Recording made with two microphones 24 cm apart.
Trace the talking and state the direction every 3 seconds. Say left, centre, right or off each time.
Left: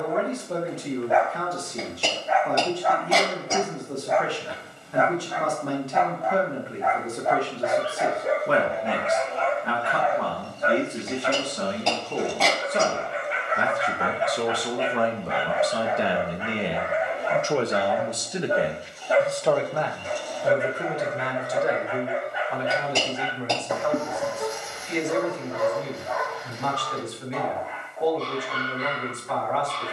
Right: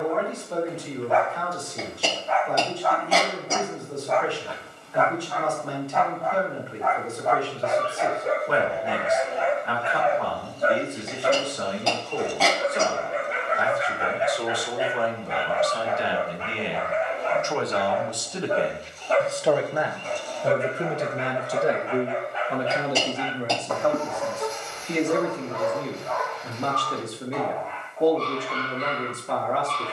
left, left, left, left, left, left, centre, right, right, right.